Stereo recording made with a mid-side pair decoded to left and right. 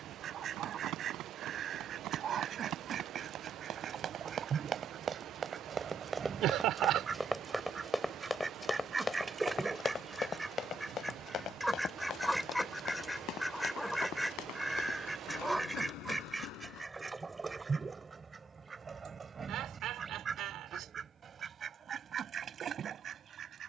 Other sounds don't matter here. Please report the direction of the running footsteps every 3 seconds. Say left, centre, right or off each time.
right, right, centre, left, left, left, off, off.